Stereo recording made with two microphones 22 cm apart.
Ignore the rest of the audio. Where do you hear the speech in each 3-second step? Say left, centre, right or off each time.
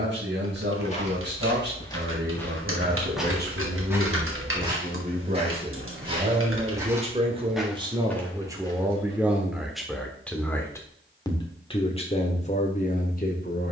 right, right, right, centre, left.